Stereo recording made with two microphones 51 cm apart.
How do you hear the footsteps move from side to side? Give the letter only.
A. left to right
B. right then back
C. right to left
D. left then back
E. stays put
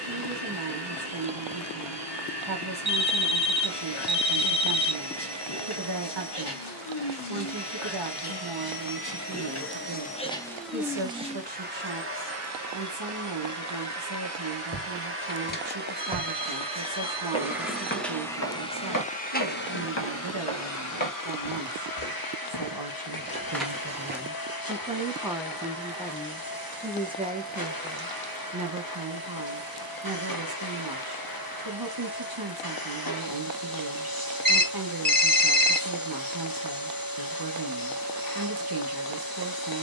D.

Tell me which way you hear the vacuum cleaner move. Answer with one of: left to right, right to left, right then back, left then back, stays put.
right then back.